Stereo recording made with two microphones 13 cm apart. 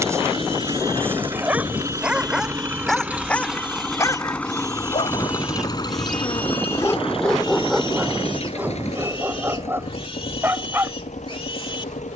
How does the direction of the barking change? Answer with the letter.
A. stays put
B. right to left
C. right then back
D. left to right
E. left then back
E.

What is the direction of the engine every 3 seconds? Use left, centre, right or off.
right, centre, left, left.